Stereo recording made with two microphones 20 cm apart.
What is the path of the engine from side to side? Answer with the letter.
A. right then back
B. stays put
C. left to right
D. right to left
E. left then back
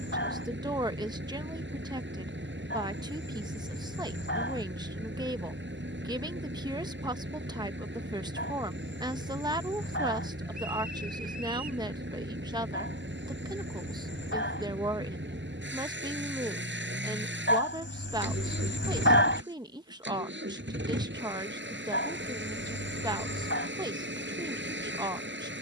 B.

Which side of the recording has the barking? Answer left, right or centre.
left.